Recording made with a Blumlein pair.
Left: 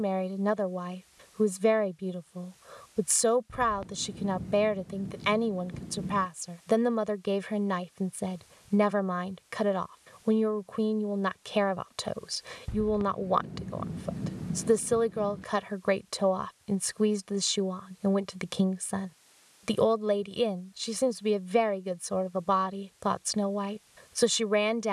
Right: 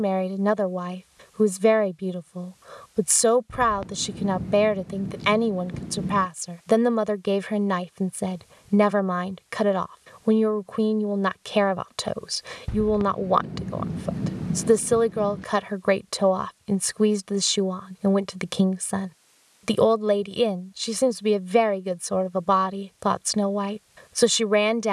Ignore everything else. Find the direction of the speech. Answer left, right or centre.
right.